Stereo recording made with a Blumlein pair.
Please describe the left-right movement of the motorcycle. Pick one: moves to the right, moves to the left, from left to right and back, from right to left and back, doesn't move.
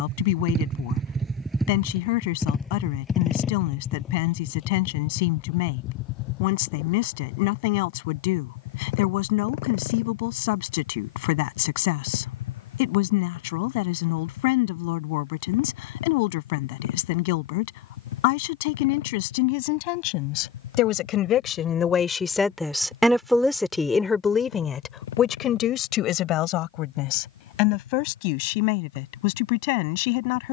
moves to the left.